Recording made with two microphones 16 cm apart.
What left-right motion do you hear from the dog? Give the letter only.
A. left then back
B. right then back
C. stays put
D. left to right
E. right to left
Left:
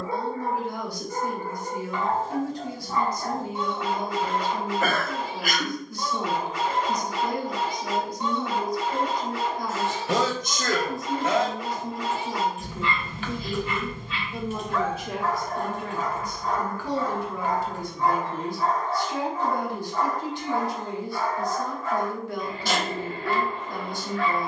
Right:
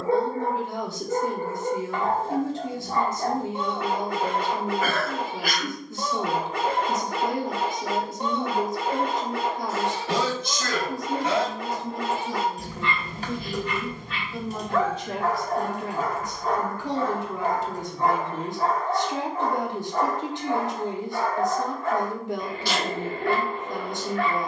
C.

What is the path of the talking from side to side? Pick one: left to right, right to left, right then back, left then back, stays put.
left then back.